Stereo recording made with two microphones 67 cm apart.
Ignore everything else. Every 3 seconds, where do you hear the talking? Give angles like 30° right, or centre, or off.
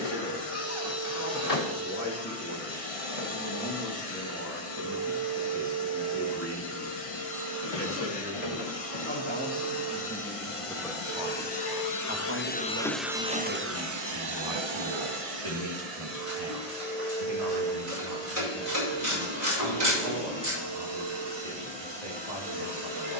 20° left, 20° left, 20° left, centre, 30° right, 60° right, 70° right, 70° right.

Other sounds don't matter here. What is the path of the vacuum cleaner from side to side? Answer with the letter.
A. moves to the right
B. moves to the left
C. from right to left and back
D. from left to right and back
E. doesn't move
A.